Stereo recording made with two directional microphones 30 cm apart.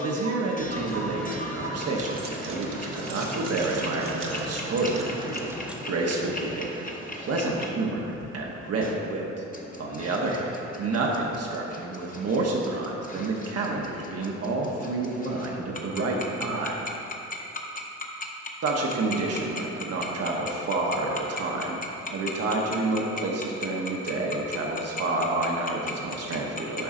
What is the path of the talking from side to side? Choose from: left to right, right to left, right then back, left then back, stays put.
stays put.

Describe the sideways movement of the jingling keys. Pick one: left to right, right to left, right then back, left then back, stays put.
right then back.